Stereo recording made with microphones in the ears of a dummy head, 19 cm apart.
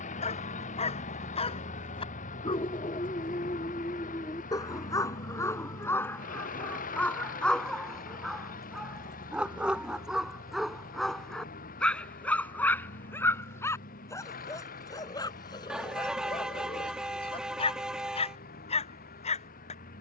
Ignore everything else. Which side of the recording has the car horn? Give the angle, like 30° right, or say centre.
centre.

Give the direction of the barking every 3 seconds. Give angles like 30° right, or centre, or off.
30° left, 20° left, centre, centre, 10° left, 20° left, 30° left.